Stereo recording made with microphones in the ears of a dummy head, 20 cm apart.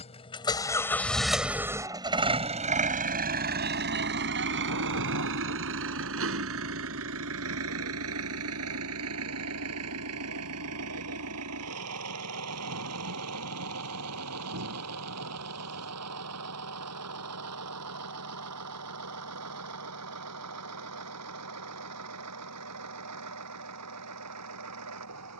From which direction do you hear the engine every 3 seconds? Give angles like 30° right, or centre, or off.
10° right, 50° right, 70° right, 80° right, 80° right, 80° right, 80° right, 80° right, 80° right.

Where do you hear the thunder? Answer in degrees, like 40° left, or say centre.
80° right.